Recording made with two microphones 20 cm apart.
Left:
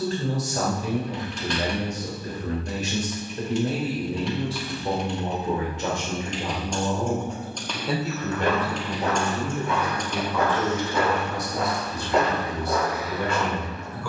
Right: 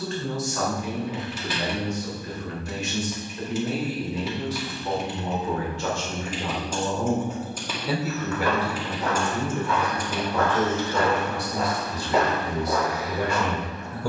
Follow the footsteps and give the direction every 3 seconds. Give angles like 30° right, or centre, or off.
off, off, 30° left, 10° left, 10° right.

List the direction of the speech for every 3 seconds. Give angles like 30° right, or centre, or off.
40° left, 30° left, centre, 30° right, 40° right.